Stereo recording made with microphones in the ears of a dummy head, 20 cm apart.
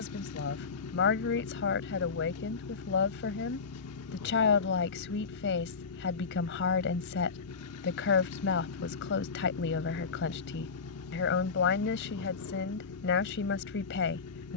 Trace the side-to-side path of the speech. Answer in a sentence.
In this clip you hear the speech stay in one place.